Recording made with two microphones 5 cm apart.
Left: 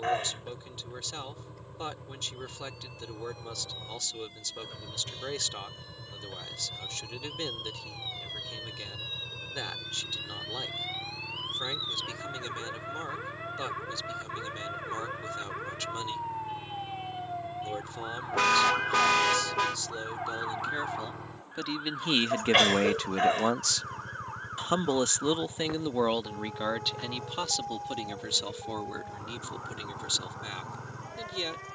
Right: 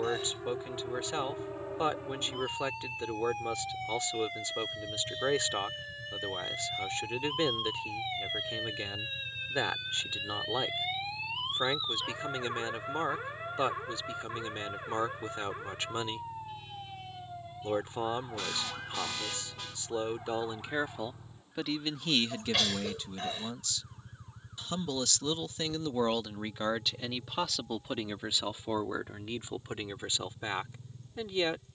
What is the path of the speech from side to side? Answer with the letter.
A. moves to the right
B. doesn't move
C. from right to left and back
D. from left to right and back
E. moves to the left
C.